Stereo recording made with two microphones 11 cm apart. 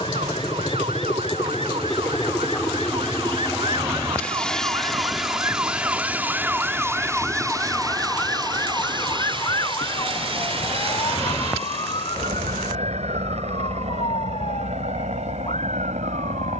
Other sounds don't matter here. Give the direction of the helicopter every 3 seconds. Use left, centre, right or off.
left, centre, right, right, right, right.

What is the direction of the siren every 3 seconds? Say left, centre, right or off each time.
right, right, centre, left, left, left.